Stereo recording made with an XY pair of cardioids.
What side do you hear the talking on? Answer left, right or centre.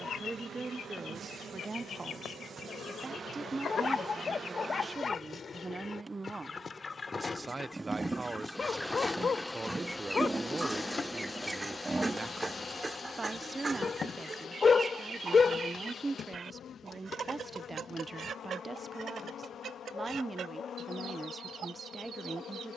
right.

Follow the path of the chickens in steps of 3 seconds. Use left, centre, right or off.
left, left, left, centre, right, right, right, right.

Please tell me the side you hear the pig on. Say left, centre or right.
right.